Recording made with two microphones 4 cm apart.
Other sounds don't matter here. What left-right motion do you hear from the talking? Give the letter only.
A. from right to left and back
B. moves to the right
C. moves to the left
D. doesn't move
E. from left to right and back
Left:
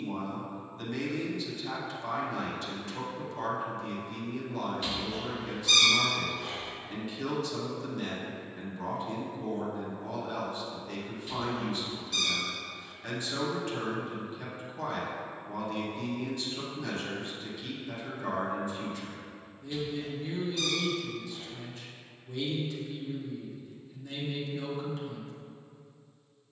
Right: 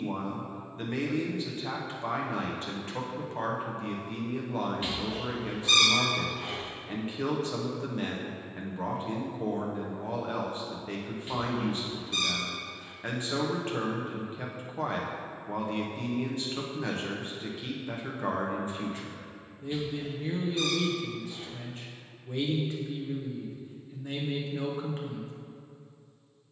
D.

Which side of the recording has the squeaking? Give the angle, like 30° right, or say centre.
30° right.